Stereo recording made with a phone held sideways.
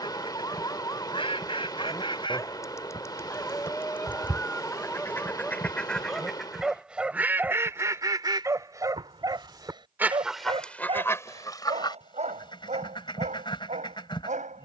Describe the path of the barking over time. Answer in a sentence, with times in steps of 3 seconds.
You can hear the barking on the left from 0 s, in the centre from 3 s and on the right from 9 s.